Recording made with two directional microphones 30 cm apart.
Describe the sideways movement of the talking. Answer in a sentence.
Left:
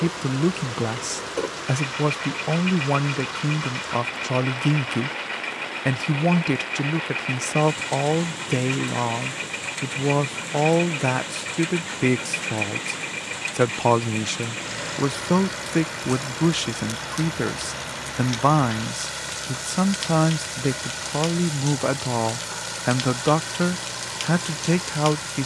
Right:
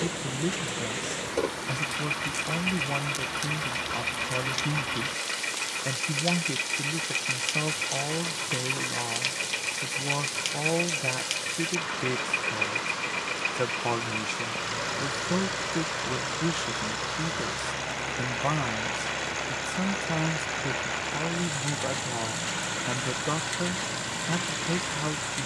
You can hear the talking stay in one place.